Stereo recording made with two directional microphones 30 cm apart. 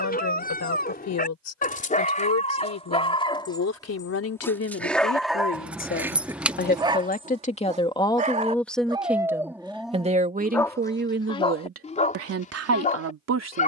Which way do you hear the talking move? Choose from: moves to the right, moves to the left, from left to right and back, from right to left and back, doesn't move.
moves to the right.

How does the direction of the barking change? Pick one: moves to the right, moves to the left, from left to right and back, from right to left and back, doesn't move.
from left to right and back.